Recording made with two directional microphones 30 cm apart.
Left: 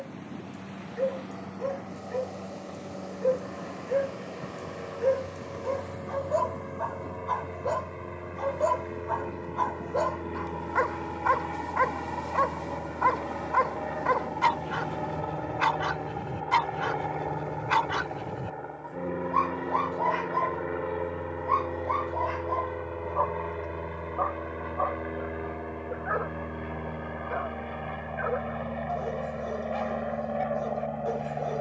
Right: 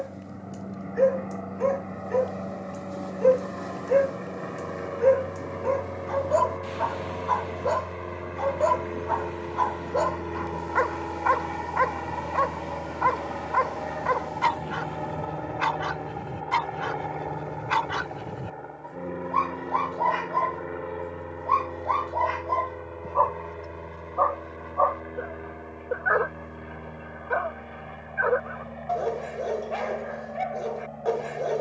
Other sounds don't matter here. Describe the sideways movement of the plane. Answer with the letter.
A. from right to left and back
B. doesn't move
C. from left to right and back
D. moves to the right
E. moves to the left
E.